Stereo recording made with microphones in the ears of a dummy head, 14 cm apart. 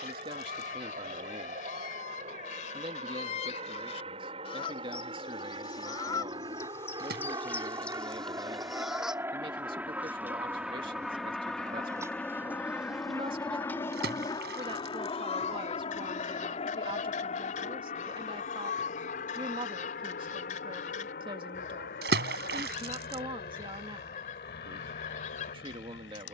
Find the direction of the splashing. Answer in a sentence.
You can hear the splashing on the right.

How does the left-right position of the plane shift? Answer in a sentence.
You can hear the plane travel towards the left.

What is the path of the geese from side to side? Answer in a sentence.
You can hear the geese move from left to right and back again.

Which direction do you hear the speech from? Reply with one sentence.
You can hear the speech on the right.